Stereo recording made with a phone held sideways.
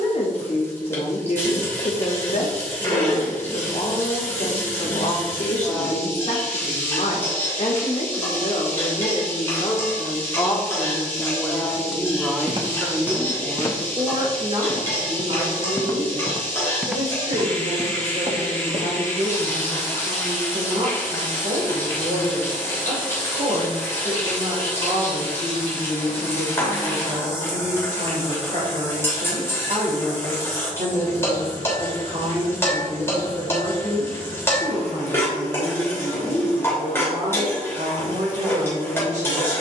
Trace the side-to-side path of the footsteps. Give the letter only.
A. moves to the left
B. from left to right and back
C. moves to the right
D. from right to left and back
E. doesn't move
D.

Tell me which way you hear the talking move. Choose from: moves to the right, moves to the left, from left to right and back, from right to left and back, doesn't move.
moves to the right.